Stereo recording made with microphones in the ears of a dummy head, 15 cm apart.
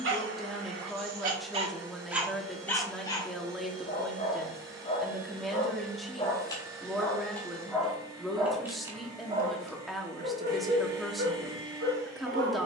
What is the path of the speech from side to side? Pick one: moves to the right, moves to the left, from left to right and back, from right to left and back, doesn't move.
doesn't move.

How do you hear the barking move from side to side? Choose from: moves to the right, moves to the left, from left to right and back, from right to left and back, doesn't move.
from right to left and back.